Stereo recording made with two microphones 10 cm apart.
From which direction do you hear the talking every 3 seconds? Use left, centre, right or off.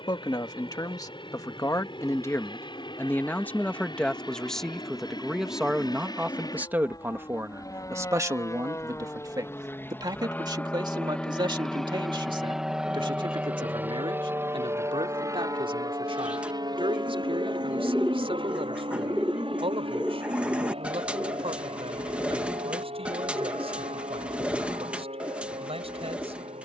left, centre, right, right, right, right, right, right, right.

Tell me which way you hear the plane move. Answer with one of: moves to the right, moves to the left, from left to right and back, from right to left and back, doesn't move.
moves to the right.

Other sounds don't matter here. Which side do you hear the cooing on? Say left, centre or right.
centre.